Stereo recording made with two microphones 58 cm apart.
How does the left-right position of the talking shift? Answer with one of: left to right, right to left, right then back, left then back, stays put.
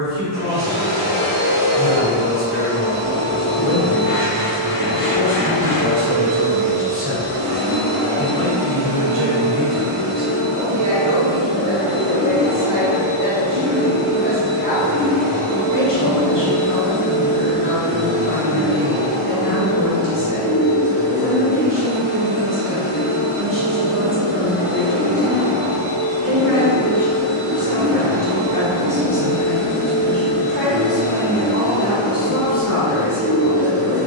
right to left.